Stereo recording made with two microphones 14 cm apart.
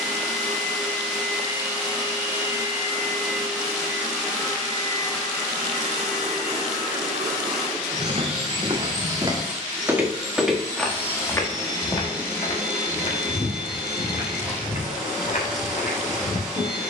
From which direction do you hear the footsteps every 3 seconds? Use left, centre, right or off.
off, off, right, centre, left, left.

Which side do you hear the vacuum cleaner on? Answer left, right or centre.
centre.